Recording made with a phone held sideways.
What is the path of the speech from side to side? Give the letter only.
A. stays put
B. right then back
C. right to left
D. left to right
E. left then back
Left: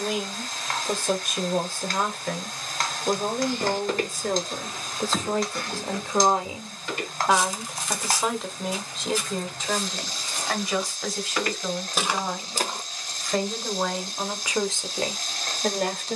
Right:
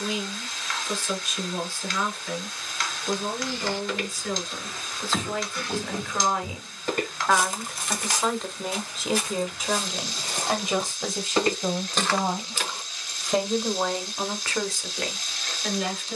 B.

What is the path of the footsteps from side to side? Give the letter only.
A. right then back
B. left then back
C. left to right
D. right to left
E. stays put
A.